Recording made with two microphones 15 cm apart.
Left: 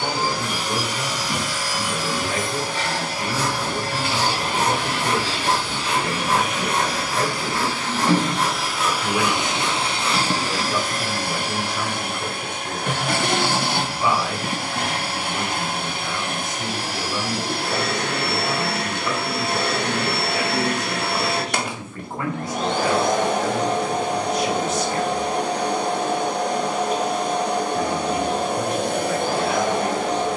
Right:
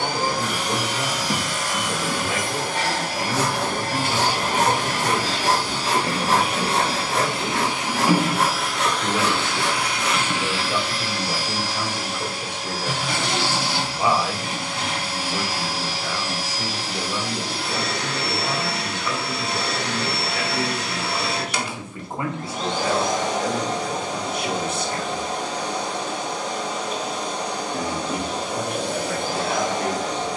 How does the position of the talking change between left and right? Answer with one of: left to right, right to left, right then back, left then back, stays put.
left then back.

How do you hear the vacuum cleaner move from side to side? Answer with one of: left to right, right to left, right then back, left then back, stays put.
right to left.